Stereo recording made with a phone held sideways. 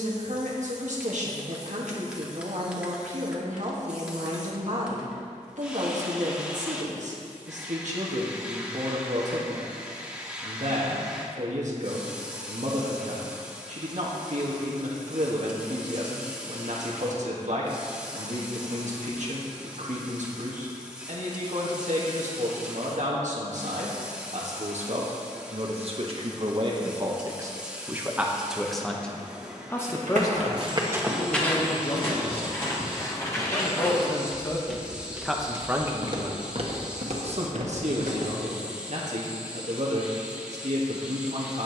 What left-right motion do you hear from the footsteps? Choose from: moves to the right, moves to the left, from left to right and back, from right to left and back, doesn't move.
from right to left and back.